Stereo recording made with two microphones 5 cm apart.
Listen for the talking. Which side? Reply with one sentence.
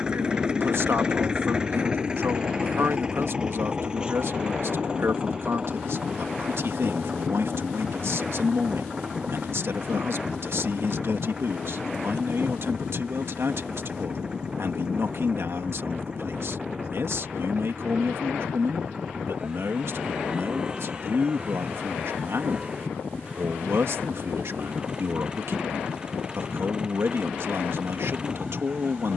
In this clip you hear the talking on the right.